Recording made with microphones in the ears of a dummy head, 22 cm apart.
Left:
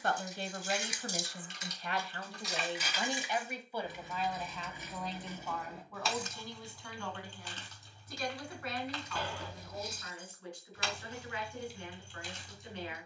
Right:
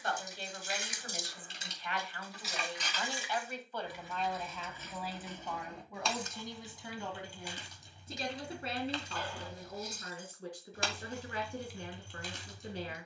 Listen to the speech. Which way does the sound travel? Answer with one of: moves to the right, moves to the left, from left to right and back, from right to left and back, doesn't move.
moves to the right.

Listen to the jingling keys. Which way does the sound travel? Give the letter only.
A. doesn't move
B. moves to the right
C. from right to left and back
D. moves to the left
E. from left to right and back
C.